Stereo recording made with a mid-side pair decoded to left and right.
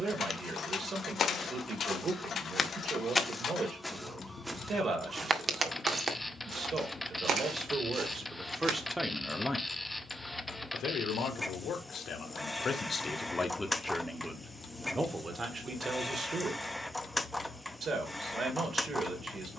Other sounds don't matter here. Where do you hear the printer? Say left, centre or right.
centre.